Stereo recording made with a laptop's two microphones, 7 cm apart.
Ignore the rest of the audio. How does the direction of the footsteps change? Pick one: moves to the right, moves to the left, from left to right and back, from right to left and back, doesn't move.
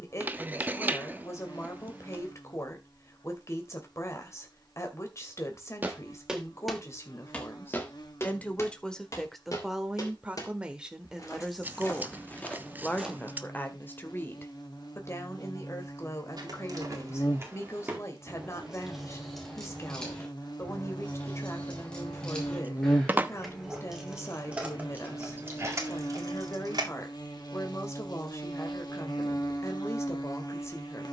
from right to left and back.